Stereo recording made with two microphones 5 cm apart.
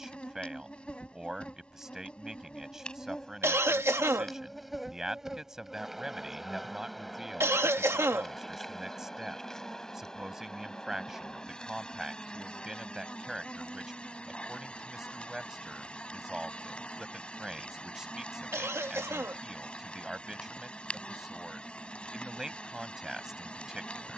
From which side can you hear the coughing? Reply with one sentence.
You can hear the coughing on the right.